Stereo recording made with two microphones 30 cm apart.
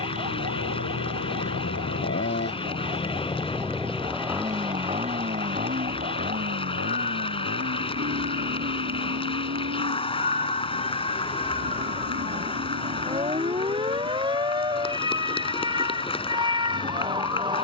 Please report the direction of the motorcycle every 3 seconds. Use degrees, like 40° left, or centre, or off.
50° left, 10° right, 40° right, 50° right, 60° right, 60° right.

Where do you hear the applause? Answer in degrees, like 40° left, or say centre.
20° left.